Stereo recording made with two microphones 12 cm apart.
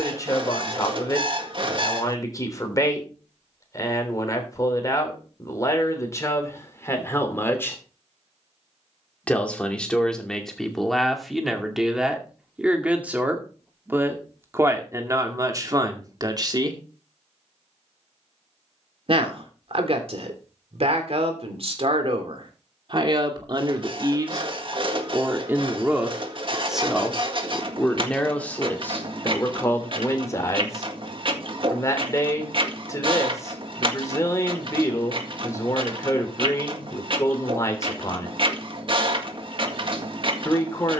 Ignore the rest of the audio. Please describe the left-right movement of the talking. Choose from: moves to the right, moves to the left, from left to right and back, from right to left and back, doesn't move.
from left to right and back.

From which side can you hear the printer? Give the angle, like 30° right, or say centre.
50° right.